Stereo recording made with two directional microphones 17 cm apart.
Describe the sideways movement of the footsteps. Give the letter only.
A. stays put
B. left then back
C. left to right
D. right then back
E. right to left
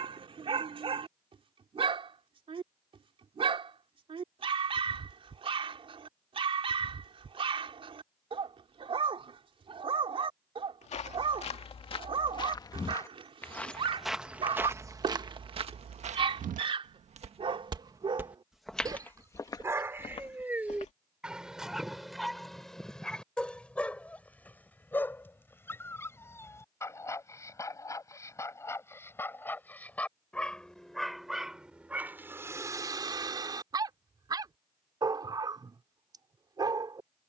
D.